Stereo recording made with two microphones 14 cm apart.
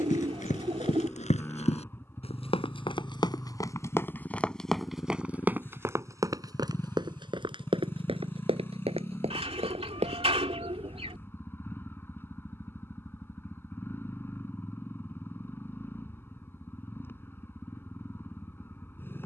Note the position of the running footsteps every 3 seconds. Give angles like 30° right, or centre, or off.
60° left, 10° left, 40° right, 50° right, off, off, off.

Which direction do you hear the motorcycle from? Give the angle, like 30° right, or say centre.
20° left.